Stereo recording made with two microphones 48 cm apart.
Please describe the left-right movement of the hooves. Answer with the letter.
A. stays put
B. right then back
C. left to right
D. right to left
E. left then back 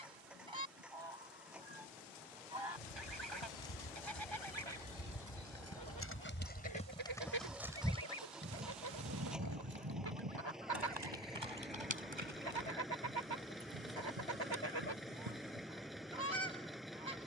C.